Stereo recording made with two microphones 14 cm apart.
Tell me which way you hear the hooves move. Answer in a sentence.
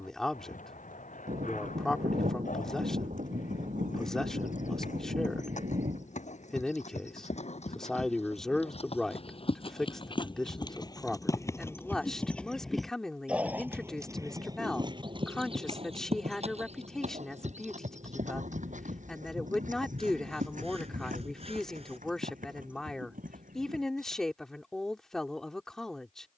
You can hear the hooves travel towards the right.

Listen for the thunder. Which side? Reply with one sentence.
You can hear the thunder on the right.